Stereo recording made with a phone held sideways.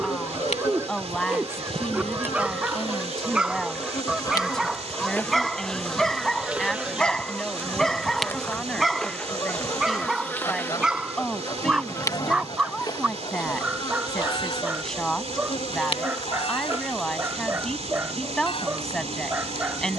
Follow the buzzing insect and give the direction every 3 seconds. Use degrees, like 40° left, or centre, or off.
50° left, 20° left, centre, 10° left, 30° left, 50° left, 50° left.